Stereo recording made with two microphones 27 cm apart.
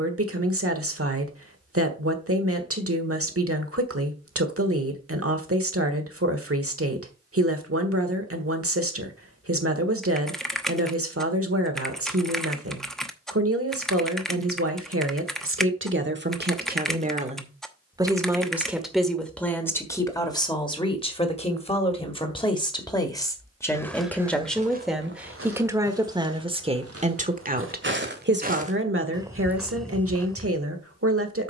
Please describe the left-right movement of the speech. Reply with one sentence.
You can hear the speech go left and come back.